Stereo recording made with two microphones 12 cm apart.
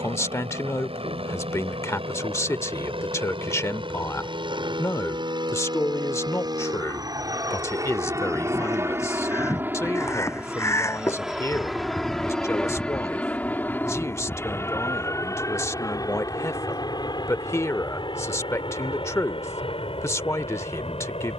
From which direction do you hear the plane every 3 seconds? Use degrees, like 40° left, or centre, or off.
60° right, 50° right, 30° right, 10° right, 10° left, 30° left, 40° left.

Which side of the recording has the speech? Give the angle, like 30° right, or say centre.
20° left.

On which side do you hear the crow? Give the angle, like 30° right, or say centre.
20° left.